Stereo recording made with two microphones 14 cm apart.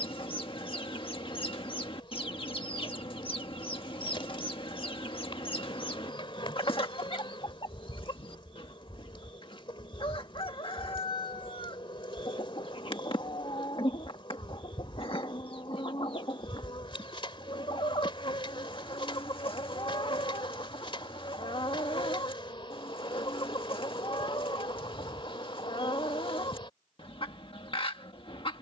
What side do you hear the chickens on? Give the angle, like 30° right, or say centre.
40° left.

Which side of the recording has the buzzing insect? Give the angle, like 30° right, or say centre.
40° left.